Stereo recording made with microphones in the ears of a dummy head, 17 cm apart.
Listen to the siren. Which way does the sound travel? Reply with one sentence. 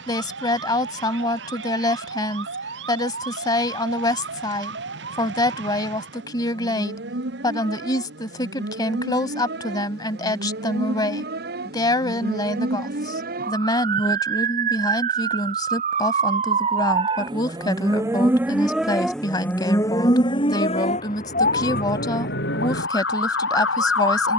In this clip you hear the siren move from right to left.